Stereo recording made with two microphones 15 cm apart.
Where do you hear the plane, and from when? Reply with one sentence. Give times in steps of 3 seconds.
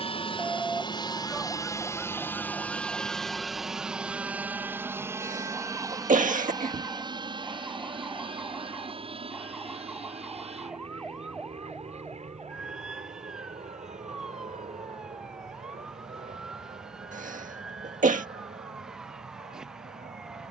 You can hear the plane on the left from 0 s, in the centre from 3 s and on the right from 6 s.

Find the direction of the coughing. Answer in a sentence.
You can hear the coughing on the right.